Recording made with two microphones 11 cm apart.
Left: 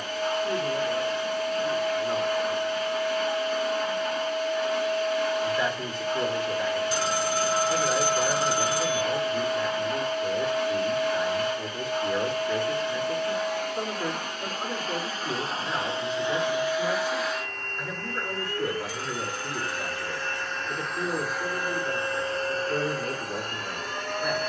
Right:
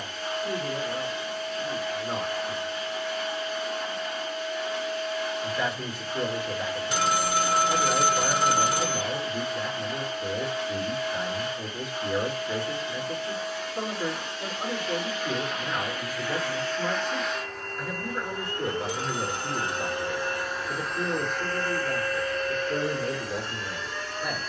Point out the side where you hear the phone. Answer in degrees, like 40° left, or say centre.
70° right.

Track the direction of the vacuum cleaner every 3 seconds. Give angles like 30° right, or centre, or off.
60° left, 60° left, 60° left, 60° left, 60° left, 20° left, 20° right, 30° left.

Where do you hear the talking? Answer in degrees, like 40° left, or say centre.
10° right.